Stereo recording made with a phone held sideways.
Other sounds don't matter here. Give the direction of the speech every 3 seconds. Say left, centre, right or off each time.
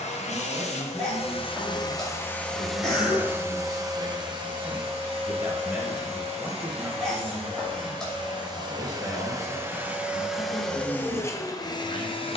right, right, centre, left.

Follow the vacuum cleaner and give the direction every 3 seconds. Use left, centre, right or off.
left, right, right, centre.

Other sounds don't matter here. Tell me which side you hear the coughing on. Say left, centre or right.
centre.